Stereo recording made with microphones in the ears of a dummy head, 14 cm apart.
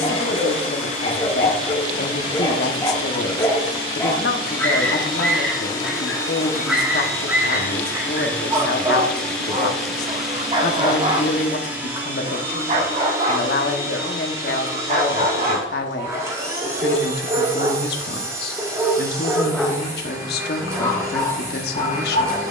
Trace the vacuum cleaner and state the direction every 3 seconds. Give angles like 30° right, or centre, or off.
50° left, 40° left, 20° left, centre, 20° right, 20° right, 20° right, 20° right.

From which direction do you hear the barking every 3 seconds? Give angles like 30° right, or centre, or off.
30° left, 10° left, 10° right, 30° right, 50° right, 40° right, centre, 30° left.